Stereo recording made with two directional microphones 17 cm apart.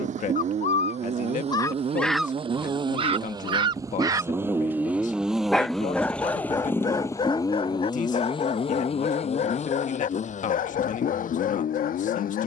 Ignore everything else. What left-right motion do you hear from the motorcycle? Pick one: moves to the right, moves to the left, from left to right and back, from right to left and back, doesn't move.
moves to the left.